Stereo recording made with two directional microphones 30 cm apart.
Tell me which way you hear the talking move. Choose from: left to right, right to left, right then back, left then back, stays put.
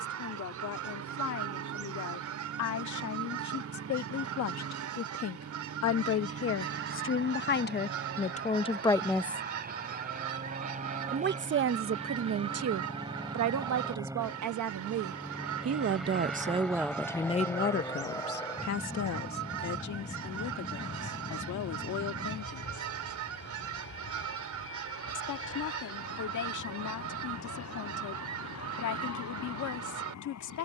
right then back.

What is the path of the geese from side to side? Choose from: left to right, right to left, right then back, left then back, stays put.
stays put.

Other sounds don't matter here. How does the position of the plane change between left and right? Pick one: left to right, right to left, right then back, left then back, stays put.
right to left.